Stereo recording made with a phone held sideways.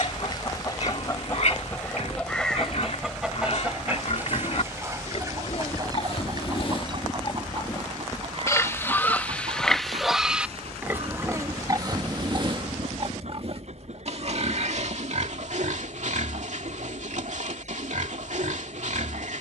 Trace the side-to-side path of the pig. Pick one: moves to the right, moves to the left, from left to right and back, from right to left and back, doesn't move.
moves to the right.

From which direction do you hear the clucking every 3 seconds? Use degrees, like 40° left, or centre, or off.
20° left, 20° right, 40° right, 50° right, 60° right, 60° right, 60° right.